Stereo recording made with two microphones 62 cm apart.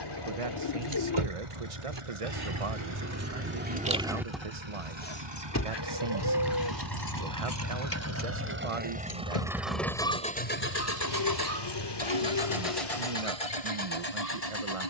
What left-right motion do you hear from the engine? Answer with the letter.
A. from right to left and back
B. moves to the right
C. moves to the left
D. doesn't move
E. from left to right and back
C.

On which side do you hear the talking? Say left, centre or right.
right.